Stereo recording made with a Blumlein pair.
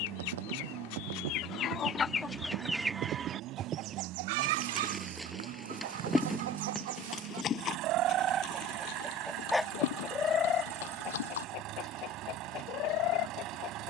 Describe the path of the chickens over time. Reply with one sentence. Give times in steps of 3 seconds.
You can hear the chickens on the left from 0 s, on the right from 3 s and on the left from 9 s.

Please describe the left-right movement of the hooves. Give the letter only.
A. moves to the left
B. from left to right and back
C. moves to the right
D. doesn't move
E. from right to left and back
A.